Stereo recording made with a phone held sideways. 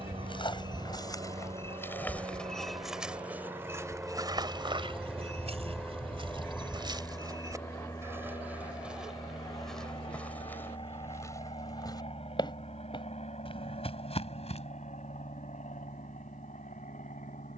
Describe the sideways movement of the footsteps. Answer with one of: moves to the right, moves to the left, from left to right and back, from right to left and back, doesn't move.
from left to right and back.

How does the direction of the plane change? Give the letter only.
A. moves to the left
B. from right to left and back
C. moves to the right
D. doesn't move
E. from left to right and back
A.